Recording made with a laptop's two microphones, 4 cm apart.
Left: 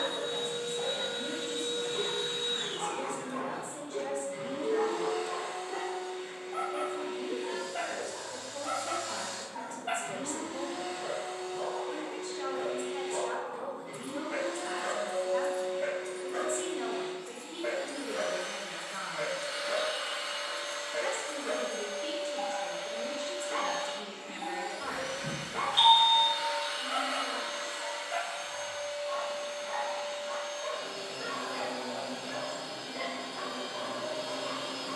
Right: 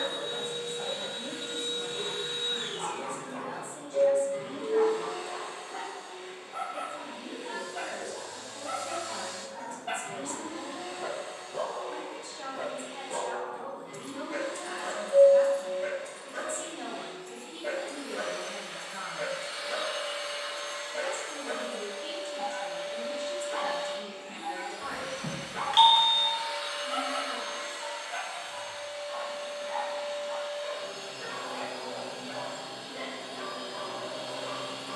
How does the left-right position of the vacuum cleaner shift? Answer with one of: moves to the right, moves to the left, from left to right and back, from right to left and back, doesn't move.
doesn't move.